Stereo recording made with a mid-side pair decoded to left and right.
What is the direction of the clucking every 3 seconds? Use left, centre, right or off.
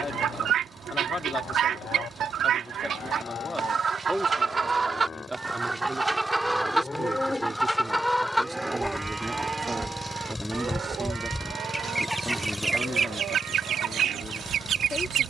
right, right, centre, centre, right.